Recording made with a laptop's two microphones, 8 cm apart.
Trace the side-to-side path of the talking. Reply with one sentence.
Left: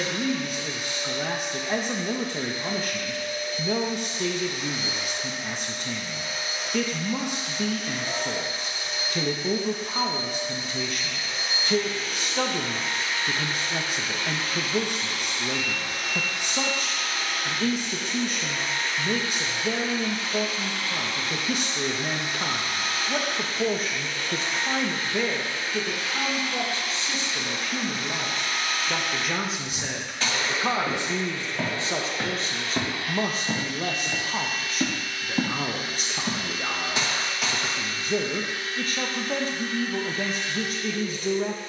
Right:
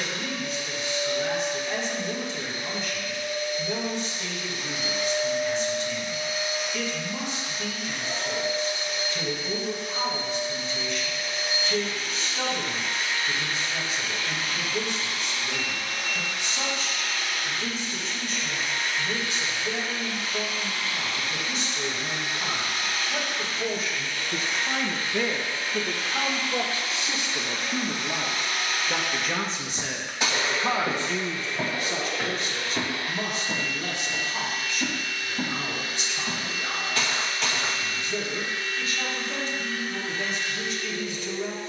You can hear the talking go right and come back.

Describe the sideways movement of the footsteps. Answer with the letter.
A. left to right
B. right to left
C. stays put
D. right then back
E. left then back
E.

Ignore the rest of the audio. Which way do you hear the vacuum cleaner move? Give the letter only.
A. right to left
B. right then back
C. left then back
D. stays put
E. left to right
E.